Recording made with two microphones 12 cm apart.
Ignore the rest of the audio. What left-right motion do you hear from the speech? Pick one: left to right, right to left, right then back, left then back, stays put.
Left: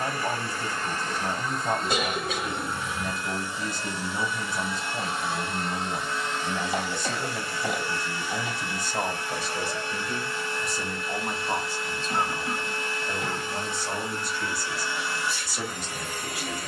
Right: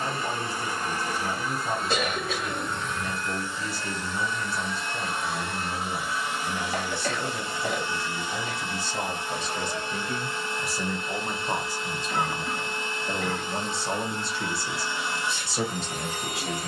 left to right.